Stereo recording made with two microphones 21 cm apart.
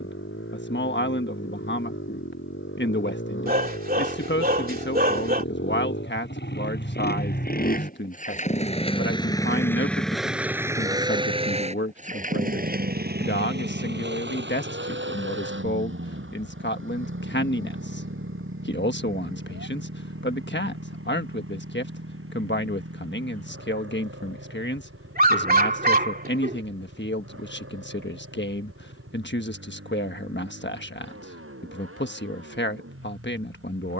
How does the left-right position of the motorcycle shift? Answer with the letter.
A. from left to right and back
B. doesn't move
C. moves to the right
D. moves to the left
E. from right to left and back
C.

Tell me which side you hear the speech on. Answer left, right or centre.
left.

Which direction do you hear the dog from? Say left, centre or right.
right.